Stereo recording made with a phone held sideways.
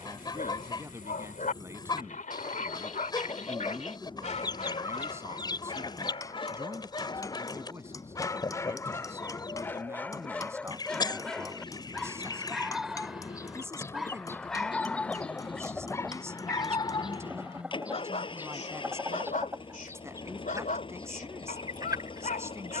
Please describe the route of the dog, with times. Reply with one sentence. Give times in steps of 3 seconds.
You can hear the dog on the left from 0 s, in the centre from 9 s and on the left from 15 s.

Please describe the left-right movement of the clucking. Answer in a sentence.
You can hear the clucking travel towards the right.